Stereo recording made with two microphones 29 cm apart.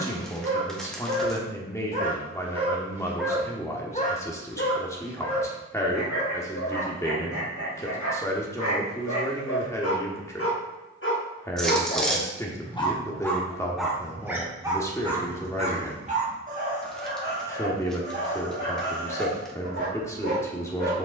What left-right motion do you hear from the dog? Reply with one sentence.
You can hear the dog move from right to left and back again.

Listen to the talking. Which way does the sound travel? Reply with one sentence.
In this clip you hear the talking stay in one place.